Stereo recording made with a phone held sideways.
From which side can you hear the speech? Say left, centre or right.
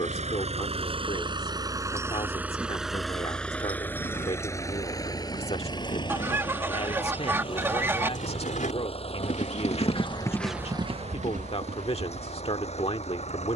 left.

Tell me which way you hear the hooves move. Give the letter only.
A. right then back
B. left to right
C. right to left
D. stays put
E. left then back
B.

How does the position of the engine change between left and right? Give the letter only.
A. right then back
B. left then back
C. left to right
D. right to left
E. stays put
D.